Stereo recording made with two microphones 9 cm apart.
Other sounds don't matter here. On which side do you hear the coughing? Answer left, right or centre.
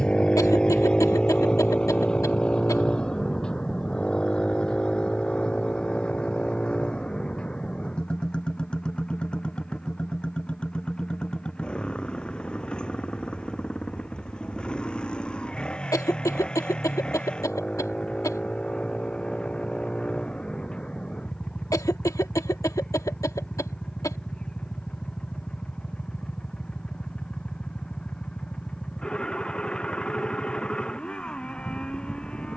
left.